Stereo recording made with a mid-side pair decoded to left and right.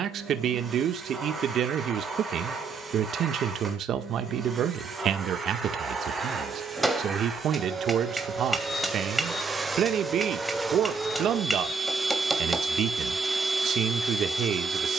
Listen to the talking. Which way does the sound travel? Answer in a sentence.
You can hear the talking stay in one place.